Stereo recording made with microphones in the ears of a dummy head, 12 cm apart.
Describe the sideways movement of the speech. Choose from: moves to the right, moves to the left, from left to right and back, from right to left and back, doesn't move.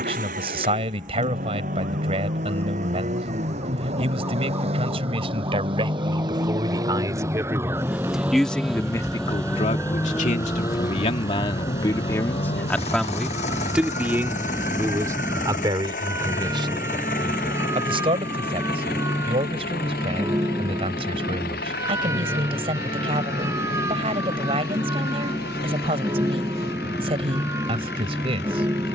from right to left and back.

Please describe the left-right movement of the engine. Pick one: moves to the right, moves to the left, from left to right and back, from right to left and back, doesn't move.
moves to the left.